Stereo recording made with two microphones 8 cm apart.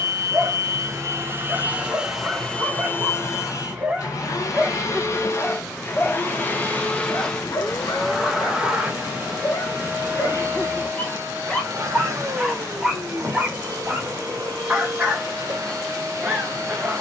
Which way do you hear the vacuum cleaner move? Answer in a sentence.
In this clip you hear the vacuum cleaner move from right to left and back again.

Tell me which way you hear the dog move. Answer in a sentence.
In this clip you hear the dog go left and come back.